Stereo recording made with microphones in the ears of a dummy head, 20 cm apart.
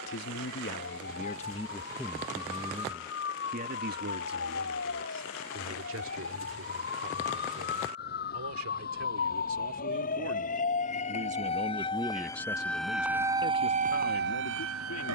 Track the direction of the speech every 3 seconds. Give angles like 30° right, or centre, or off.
20° left, 50° right, 70° right, 50° right, 40° left.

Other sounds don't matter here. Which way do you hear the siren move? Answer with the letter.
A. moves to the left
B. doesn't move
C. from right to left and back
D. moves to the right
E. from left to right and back
D.